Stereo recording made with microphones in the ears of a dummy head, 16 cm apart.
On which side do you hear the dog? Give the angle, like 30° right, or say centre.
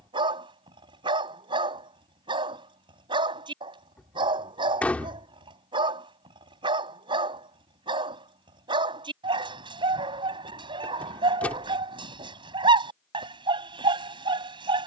30° right.